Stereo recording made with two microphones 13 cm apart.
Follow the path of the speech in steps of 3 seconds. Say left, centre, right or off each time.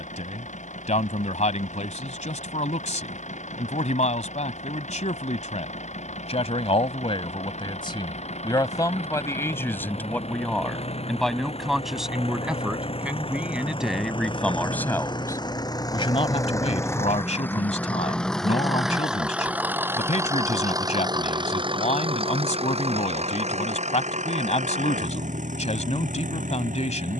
left, left, left, centre, centre, left, left, left, left.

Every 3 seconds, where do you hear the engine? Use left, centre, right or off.
left, left, left, left, left, left, centre, right, right.